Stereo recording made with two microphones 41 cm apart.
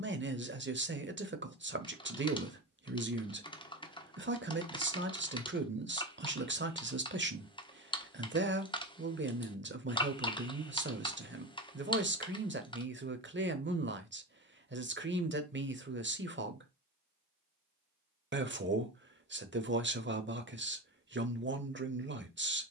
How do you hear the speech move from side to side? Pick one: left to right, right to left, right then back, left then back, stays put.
stays put.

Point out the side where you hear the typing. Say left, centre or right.
centre.